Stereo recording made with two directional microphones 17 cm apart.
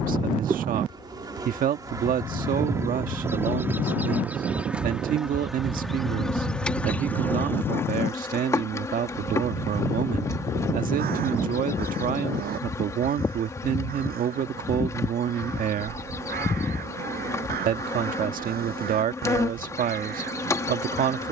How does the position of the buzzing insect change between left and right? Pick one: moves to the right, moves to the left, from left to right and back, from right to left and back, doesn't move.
moves to the left.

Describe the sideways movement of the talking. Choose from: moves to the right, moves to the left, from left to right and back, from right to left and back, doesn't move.
doesn't move.